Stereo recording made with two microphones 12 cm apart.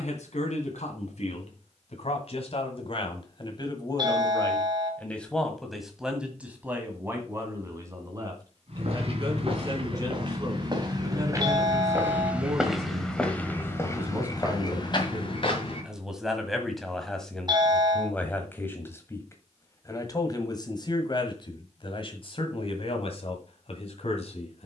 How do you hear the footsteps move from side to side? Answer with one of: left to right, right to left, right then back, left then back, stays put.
right to left.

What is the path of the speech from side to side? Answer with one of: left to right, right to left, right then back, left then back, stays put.
right then back.